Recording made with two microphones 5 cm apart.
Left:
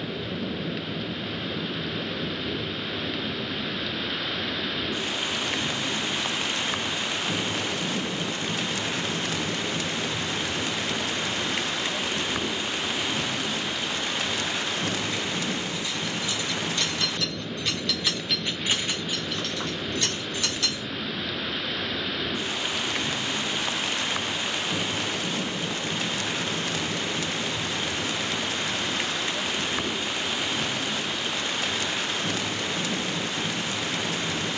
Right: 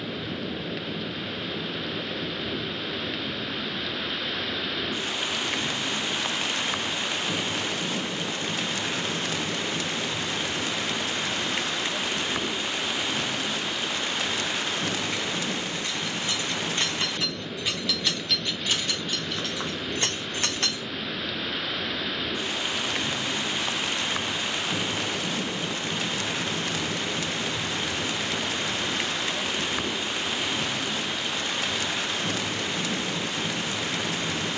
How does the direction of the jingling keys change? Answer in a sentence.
In this clip you hear the jingling keys go left and come back.